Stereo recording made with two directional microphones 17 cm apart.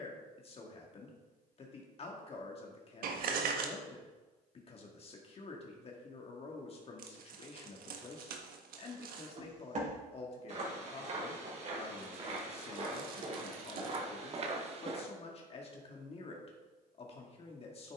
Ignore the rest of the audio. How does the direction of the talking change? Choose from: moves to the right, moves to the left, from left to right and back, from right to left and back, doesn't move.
doesn't move.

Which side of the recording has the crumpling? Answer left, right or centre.
right.